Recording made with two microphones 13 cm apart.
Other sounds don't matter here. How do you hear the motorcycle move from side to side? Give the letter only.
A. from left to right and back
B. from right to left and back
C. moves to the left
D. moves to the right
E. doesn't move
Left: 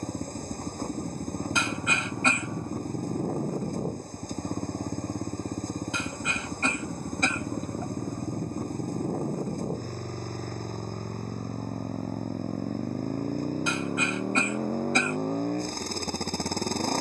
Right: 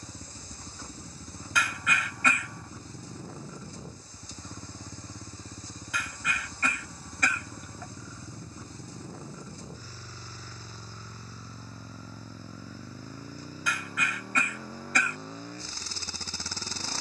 E.